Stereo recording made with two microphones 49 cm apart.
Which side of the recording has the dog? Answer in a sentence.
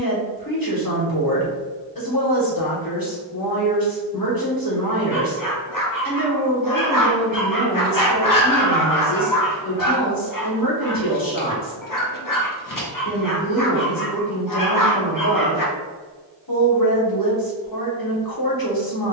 In this clip you hear the dog on the left.